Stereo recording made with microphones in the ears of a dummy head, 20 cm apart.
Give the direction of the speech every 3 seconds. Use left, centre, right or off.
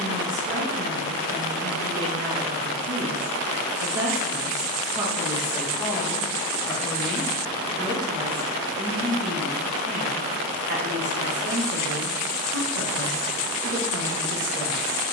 right, right, centre, right, right.